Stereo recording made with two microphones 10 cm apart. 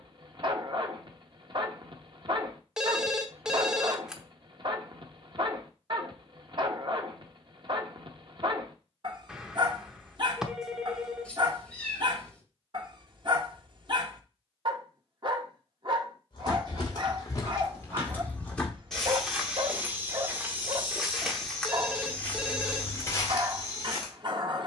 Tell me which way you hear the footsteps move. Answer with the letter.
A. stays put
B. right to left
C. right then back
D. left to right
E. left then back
C.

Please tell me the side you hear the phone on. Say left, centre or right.
centre.